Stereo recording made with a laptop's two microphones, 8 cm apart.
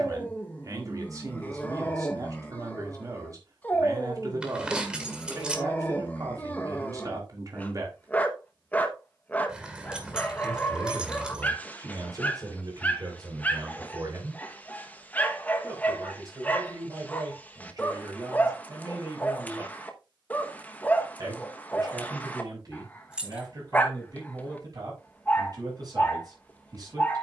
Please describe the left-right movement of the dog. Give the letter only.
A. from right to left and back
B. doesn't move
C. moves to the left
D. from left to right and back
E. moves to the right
B.